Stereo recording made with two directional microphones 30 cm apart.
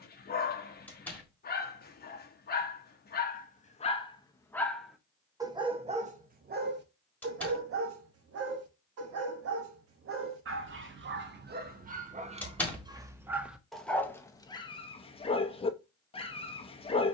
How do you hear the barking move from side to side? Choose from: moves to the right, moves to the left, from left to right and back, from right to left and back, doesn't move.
from left to right and back.